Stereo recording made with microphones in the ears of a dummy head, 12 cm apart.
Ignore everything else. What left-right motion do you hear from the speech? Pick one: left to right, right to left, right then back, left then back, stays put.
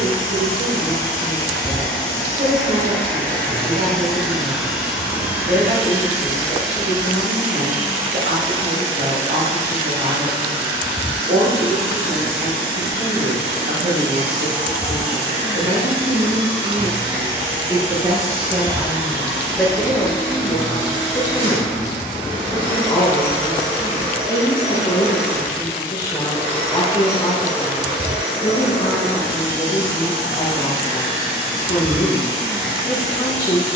right to left.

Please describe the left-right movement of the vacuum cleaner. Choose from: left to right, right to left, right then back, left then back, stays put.
left to right.